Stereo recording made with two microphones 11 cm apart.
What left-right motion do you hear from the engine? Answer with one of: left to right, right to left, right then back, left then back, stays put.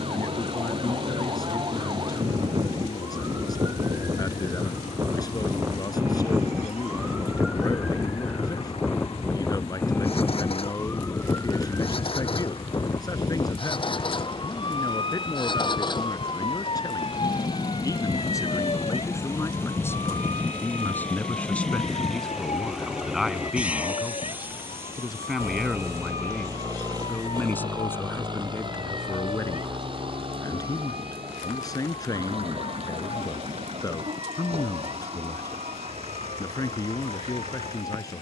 left to right.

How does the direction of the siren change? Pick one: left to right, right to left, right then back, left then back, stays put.
right to left.